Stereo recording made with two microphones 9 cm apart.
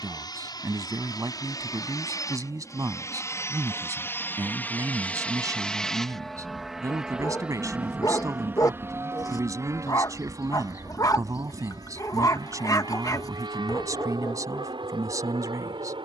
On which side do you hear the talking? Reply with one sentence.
In this clip you hear the talking on the right.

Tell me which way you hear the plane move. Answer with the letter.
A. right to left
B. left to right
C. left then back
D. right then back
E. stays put
B.